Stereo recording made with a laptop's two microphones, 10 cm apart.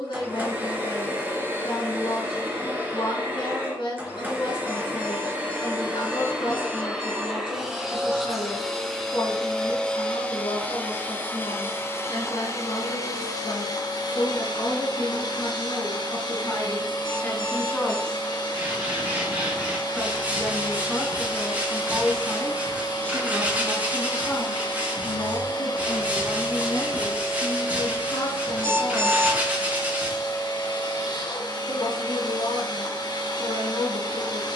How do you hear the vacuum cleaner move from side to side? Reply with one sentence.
In this clip you hear the vacuum cleaner move to the left.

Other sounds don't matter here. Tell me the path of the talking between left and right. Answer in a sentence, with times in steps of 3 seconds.
You can hear the talking on the left from 0 s, in the centre from 18 s and on the left from 24 s.